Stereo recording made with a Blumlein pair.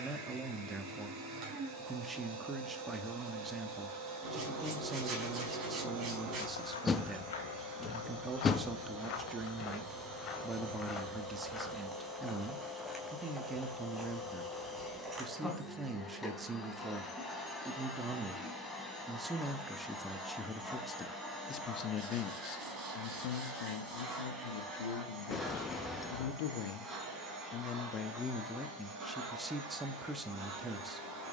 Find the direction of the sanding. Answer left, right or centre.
right.